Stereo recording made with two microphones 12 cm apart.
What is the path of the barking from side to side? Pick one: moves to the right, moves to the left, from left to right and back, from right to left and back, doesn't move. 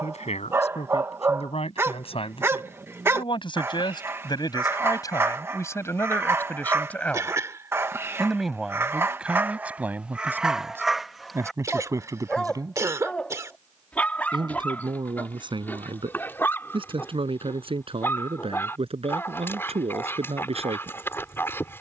moves to the left.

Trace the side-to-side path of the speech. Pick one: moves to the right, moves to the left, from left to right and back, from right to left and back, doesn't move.
moves to the right.